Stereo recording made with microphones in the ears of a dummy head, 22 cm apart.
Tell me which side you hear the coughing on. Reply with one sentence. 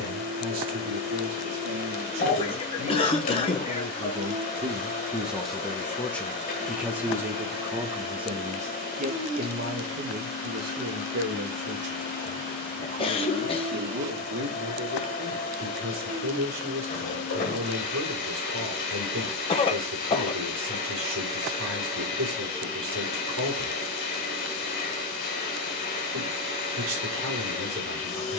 You can hear the coughing on the left.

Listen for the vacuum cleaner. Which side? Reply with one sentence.
You can hear the vacuum cleaner on the left.